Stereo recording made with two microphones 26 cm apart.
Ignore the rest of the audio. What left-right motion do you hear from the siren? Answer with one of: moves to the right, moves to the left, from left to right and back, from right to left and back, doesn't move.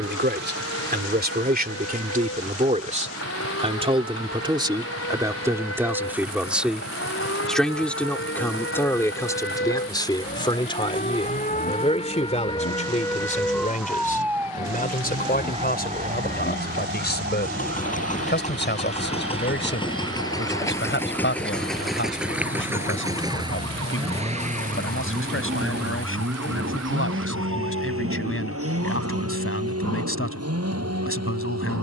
moves to the right.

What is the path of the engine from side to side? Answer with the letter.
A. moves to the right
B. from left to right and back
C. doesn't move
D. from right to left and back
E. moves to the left
A.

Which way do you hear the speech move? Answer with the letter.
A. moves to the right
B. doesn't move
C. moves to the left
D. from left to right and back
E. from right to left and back
C.